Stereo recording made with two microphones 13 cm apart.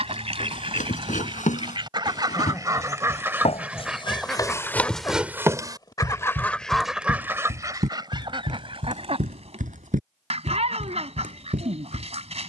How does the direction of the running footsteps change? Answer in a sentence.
You can hear the running footsteps travel towards the right.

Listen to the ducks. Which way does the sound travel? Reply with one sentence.
In this clip you hear the ducks move from right to left and back again.